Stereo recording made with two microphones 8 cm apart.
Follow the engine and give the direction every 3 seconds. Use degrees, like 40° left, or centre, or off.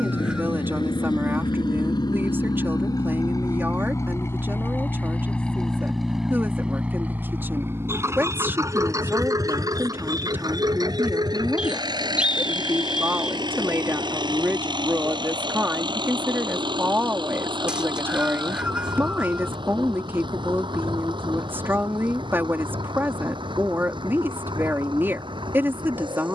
60° left, 30° left, 20° right, 50° right, 60° right, 70° right, 70° right, 70° right, 70° right.